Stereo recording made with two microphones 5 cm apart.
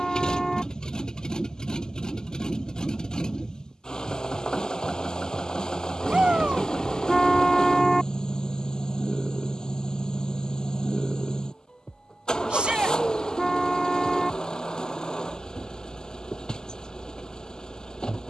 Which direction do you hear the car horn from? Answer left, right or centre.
centre.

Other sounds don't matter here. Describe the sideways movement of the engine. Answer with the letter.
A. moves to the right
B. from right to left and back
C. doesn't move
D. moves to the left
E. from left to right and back
C.